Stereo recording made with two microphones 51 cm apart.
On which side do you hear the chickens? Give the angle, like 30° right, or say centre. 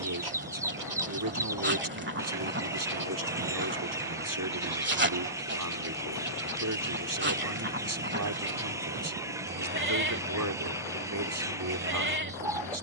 10° right.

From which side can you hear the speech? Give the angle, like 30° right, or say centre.
40° right.